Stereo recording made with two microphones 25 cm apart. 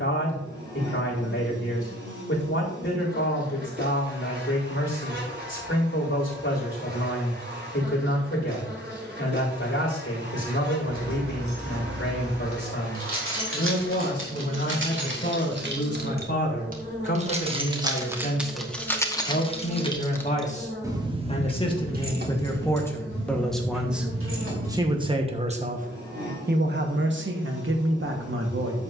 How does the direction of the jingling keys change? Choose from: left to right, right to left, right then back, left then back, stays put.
left then back.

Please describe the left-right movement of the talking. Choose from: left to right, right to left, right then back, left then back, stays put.
left to right.